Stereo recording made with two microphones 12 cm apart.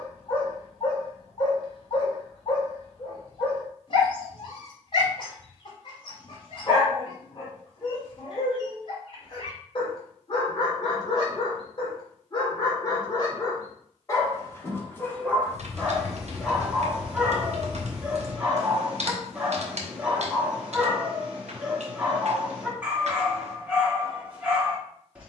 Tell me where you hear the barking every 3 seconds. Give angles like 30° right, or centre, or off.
50° left, 50° left, 50° left, 50° left, 30° left, centre, 10° right, 10° right, 10° right.